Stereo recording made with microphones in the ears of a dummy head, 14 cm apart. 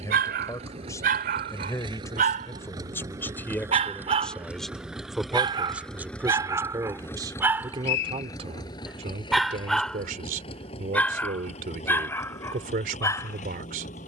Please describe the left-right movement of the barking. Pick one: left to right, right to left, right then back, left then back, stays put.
right to left.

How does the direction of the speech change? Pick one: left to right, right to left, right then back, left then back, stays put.
left to right.